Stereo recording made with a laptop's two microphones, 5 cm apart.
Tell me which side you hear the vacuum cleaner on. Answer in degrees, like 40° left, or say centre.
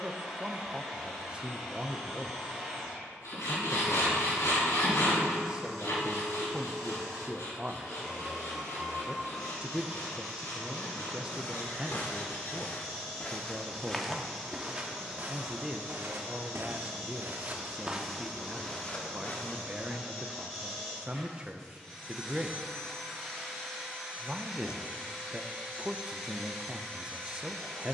10° left.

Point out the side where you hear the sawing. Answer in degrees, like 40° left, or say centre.
80° left.